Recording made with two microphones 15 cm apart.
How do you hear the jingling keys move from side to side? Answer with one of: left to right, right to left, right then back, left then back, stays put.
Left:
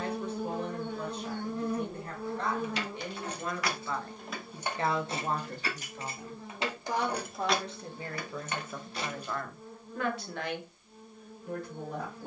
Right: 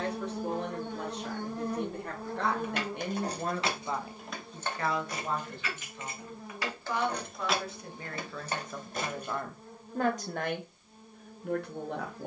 left then back.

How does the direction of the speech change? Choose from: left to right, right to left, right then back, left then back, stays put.
left then back.